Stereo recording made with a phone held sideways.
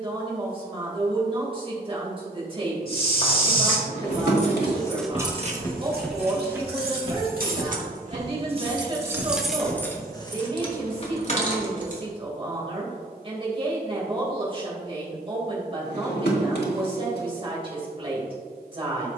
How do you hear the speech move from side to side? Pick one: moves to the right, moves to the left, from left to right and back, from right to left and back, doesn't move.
doesn't move.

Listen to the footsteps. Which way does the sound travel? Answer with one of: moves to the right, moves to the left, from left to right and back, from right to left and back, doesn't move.
moves to the right.